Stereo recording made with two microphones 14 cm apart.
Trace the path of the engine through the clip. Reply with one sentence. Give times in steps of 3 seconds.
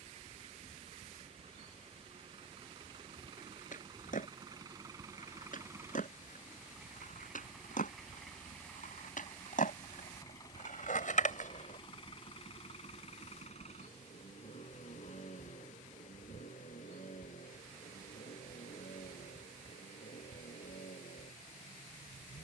In this clip you hear the engine on the right from 0 s, in the centre from 6 s and on the left from 9 s.